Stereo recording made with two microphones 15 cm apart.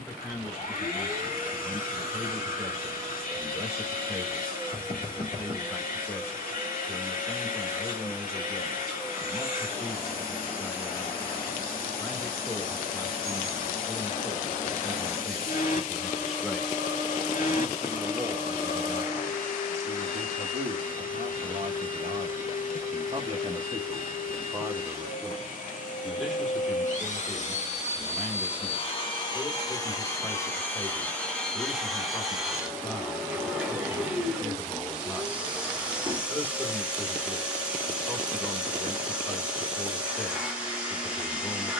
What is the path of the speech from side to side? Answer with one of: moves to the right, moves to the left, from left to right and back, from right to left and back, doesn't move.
from left to right and back.